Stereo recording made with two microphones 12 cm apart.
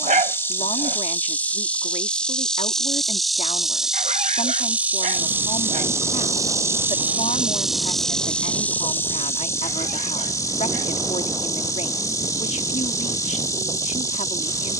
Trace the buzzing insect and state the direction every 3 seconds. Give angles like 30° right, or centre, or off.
10° left, 10° right, 10° right, 20° left, 30° left.